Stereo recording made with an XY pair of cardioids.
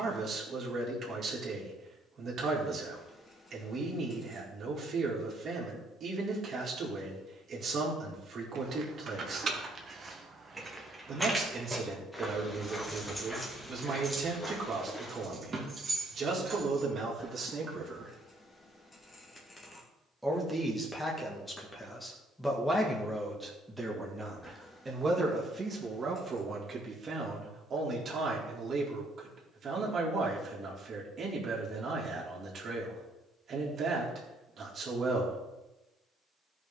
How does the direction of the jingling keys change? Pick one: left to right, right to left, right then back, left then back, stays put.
left then back.